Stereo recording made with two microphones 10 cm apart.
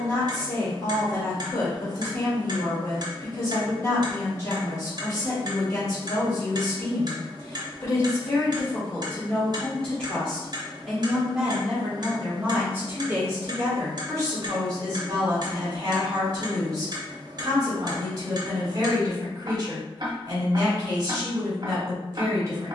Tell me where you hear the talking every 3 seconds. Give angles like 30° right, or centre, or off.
30° left, 30° left, 30° left, centre, 30° right, 40° right, 40° right, 40° right.